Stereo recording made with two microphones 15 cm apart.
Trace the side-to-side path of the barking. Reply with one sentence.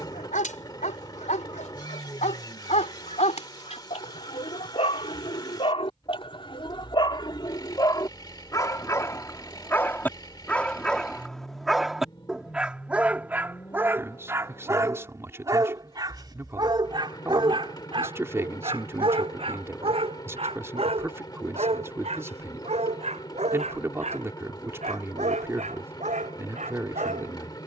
You can hear the barking move to the right.